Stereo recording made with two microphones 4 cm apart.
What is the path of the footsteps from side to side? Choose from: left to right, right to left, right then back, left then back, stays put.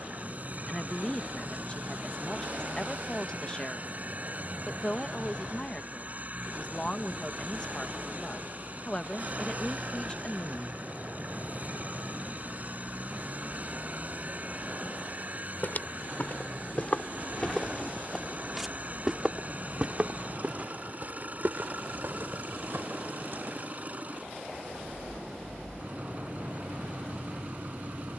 left to right.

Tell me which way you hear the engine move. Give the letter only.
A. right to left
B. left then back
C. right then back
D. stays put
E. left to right
D.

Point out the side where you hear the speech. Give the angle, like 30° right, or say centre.
20° left.